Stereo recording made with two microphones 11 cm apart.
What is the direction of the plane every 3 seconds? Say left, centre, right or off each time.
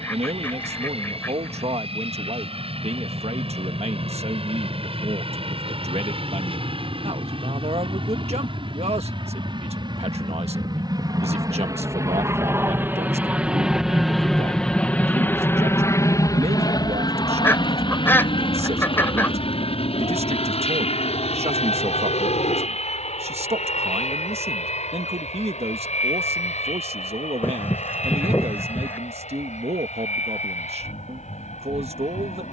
right, right, right, right, centre, left, left, left, left, left, left.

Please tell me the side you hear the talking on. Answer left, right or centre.
right.